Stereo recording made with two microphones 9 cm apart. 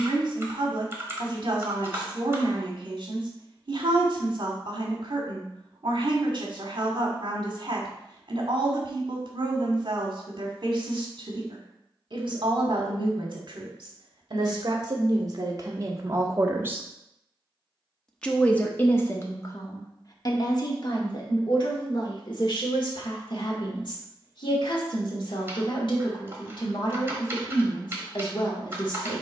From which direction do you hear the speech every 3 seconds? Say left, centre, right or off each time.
right, right, right, right, right, right, left, left, left, left.